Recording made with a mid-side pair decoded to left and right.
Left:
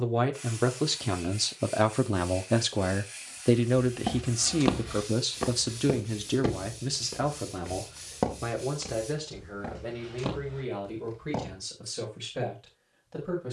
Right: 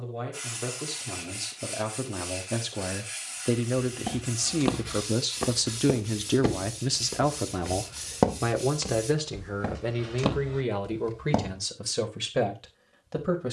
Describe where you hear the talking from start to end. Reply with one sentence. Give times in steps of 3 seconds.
In this clip you hear the talking on the left from 0 s, in the centre from 3 s and on the right from 6 s.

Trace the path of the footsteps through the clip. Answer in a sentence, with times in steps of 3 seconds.
You can hear the footsteps not at all from 0 s, in the centre from 3 s, on the right from 6 s and not at all from 12 s.